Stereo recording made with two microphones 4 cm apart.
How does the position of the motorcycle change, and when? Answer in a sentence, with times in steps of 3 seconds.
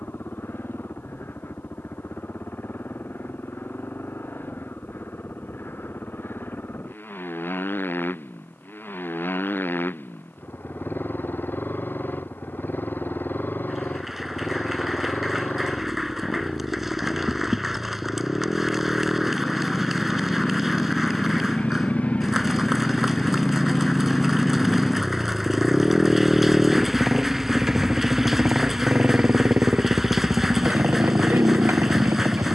You can hear the motorcycle on the left from 0 s, in the centre from 24 s and on the right from 27 s.